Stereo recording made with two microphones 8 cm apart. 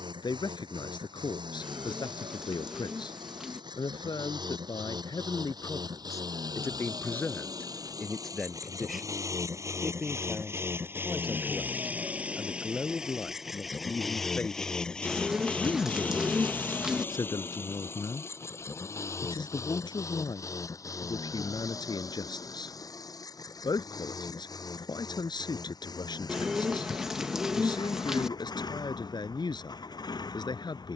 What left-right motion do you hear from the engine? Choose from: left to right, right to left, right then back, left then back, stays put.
right to left.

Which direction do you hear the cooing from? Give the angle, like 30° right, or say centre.
10° right.